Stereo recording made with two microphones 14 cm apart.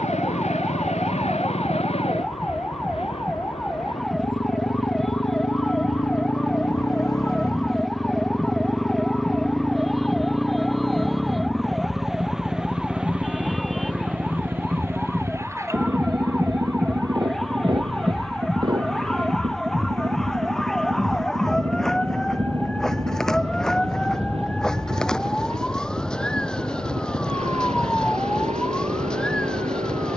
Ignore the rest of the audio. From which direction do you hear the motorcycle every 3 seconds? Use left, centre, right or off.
left, left, left, centre, centre, right, right, right, right, right.